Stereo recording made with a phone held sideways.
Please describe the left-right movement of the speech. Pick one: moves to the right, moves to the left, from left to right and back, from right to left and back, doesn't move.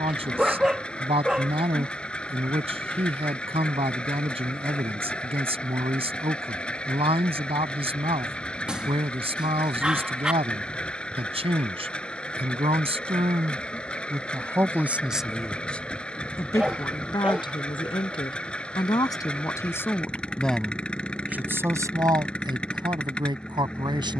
from right to left and back.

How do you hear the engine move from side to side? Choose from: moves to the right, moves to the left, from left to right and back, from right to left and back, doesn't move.
doesn't move.